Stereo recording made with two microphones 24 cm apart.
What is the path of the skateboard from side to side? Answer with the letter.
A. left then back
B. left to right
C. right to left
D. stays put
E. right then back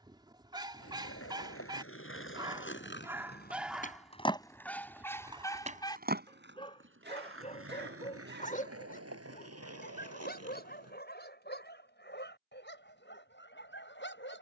B.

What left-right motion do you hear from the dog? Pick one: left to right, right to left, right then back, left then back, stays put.
right to left.